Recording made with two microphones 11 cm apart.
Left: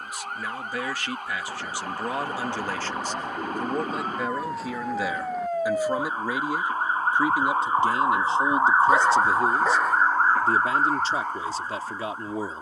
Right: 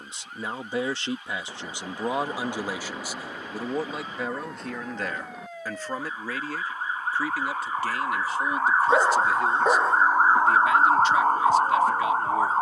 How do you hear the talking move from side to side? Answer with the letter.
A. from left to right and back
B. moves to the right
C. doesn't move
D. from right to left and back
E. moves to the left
E.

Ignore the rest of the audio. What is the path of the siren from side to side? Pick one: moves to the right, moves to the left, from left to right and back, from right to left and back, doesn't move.
moves to the right.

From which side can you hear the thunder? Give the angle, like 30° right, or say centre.
centre.